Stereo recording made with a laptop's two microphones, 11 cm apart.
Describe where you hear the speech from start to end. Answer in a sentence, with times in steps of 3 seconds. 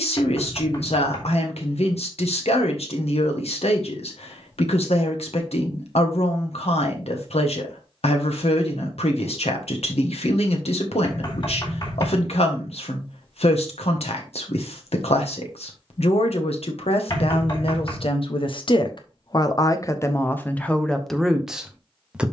You can hear the speech on the left from 0 s and in the centre from 21 s.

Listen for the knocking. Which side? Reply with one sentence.
You can hear the knocking on the left.